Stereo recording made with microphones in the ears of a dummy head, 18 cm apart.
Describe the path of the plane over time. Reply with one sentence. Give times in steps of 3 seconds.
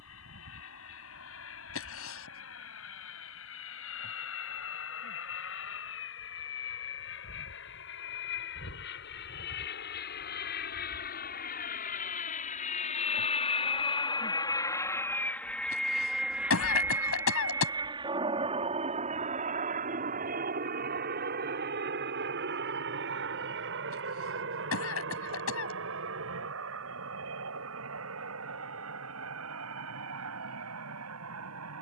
You can hear the plane on the left from 0 s, in the centre from 15 s and on the right from 18 s.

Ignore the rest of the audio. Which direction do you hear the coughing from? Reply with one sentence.
In this clip you hear the coughing on the left.